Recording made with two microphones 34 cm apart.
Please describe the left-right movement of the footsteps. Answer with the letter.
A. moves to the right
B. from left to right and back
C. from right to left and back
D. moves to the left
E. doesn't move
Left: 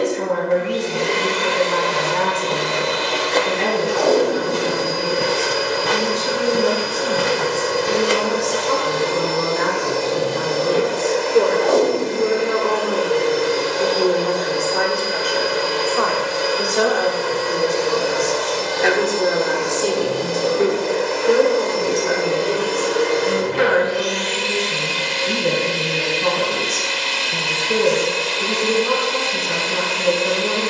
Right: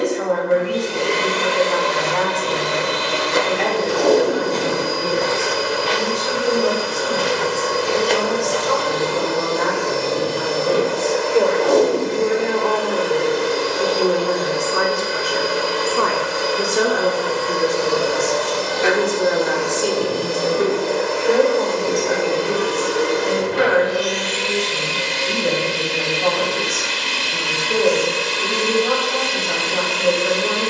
C.